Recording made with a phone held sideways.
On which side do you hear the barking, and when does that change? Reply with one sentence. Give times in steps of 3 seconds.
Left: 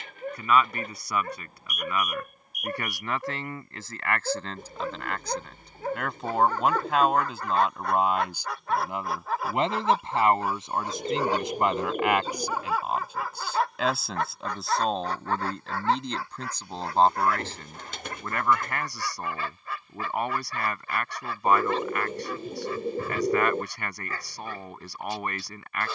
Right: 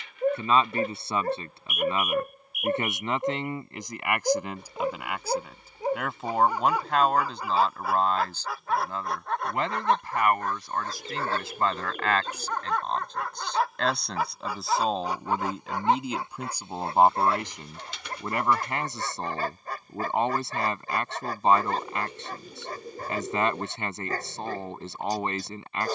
In this clip you hear the barking on the right from 0 s, in the centre from 6 s and on the right from 15 s.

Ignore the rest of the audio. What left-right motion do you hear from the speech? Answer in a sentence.
In this clip you hear the speech move from right to left and back again.